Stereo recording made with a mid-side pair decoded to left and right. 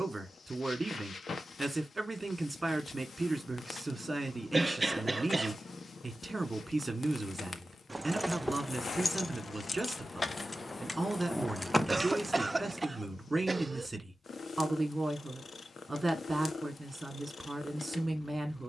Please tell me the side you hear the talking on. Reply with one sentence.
You can hear the talking on the right.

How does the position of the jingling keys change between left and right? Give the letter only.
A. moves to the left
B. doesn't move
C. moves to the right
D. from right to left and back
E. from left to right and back
D.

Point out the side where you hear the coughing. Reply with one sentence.
In this clip you hear the coughing on the right.